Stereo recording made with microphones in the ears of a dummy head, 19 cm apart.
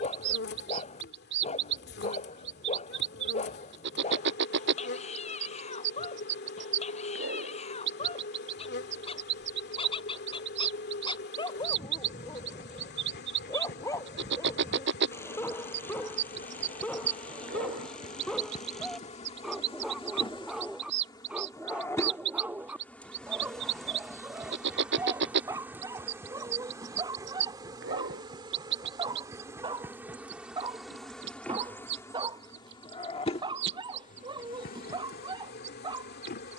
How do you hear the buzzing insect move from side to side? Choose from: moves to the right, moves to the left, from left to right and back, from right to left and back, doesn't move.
from left to right and back.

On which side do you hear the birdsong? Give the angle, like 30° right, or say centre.
60° right.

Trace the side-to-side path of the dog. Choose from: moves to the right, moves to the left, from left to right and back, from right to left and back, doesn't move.
moves to the right.